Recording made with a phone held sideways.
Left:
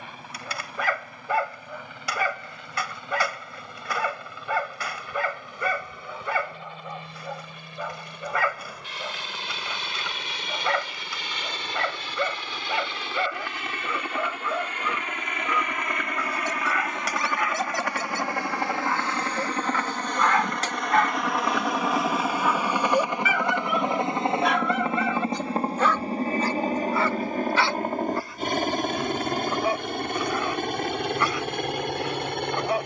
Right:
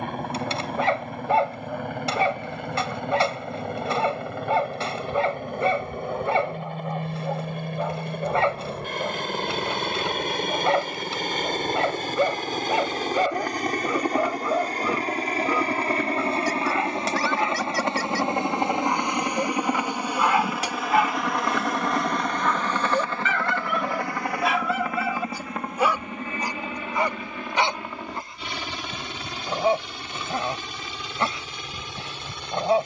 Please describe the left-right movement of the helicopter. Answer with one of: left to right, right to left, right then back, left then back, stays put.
right to left.